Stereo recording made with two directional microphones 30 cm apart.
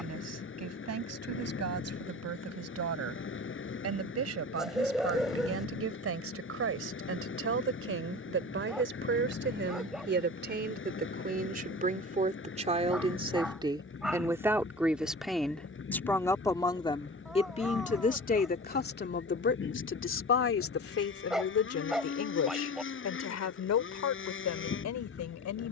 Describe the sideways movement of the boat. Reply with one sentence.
In this clip you hear the boat stay put.